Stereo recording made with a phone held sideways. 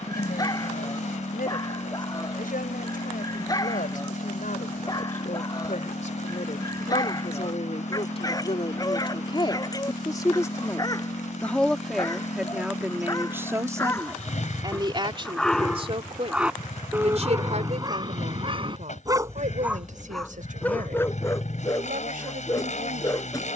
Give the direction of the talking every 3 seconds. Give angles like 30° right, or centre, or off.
70° left, 60° left, 50° left, 20° left, 20° right, 40° right, 60° right, 60° right.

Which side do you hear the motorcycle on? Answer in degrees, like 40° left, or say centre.
50° left.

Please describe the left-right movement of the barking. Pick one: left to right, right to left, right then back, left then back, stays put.
right then back.